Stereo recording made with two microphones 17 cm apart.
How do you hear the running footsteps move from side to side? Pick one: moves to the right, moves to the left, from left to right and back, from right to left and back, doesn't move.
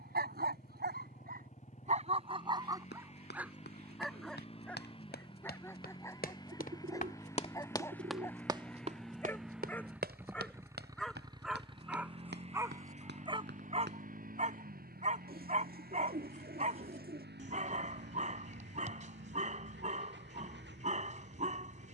moves to the right.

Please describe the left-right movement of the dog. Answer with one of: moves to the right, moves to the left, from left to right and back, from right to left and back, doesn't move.
from right to left and back.